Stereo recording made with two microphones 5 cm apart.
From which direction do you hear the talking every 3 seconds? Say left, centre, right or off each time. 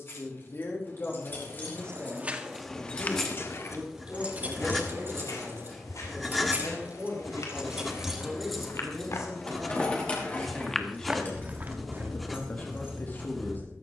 left, right, right, centre, left.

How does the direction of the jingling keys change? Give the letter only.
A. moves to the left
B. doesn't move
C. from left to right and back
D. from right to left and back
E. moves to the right
C.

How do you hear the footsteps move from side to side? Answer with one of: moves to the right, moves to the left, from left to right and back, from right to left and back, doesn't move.
from right to left and back.